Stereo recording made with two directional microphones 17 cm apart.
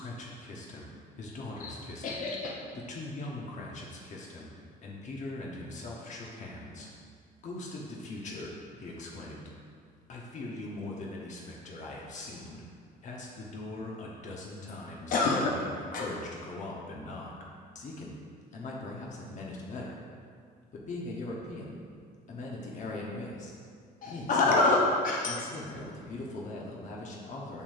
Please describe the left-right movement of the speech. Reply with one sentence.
You can hear the speech stay in one place.